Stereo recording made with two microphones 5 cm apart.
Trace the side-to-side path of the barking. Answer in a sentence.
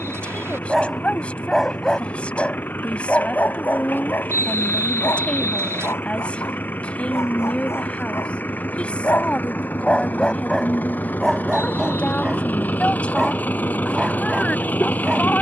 You can hear the barking go left and come back.